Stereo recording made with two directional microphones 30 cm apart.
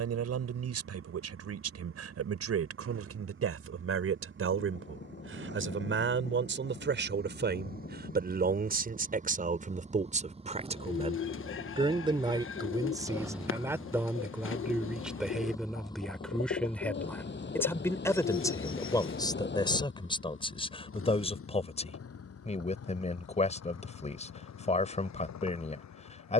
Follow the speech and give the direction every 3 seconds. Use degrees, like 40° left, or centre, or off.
50° right, 50° right, 40° right, 20° right, 10° right, centre, 10° left, 20° left, 20° left.